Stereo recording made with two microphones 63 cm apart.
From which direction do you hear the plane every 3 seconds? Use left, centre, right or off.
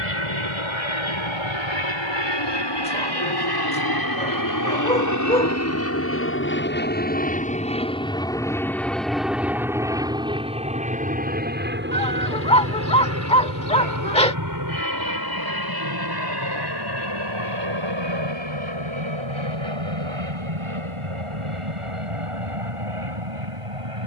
left, left, centre, centre, right, right, right, right.